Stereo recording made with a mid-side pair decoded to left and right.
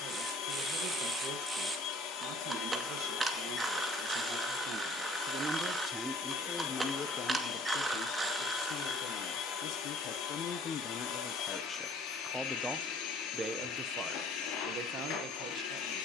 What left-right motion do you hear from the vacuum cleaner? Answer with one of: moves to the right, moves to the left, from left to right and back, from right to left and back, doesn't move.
doesn't move.